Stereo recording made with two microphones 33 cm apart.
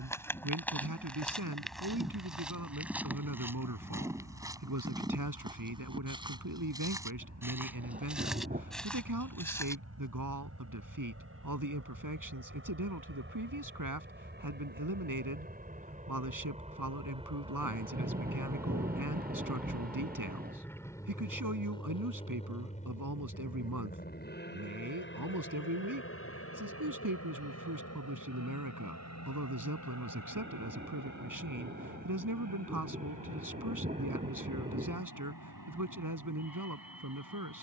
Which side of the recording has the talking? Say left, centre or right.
right.